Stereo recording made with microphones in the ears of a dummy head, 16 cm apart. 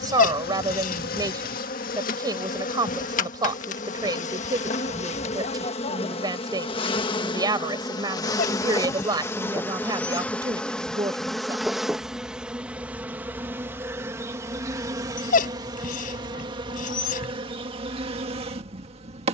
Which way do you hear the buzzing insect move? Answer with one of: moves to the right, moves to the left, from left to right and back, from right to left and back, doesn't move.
moves to the right.